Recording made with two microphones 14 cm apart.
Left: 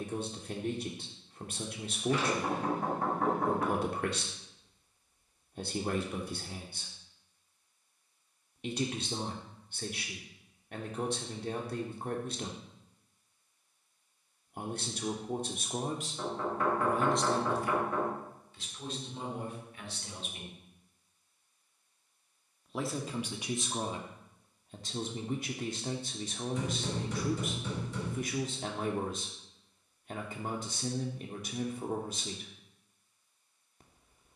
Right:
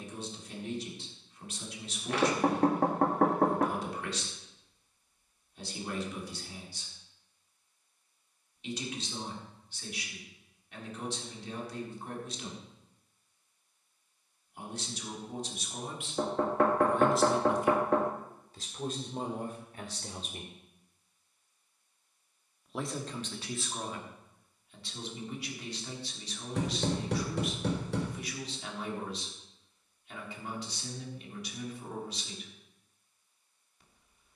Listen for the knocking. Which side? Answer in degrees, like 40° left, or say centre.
70° right.